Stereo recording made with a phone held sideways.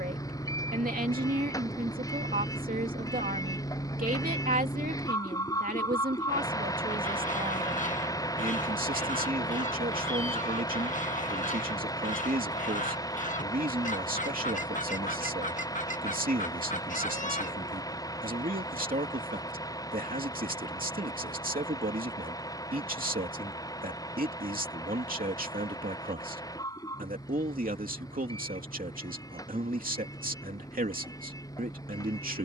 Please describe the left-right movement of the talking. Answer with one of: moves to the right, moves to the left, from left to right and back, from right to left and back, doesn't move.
doesn't move.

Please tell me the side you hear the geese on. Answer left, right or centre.
left.